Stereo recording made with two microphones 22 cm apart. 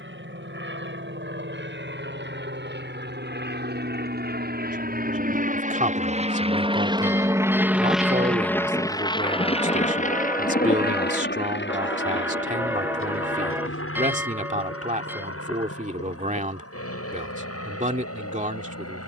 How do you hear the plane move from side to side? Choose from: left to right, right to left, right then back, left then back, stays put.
right to left.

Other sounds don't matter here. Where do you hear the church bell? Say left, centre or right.
centre.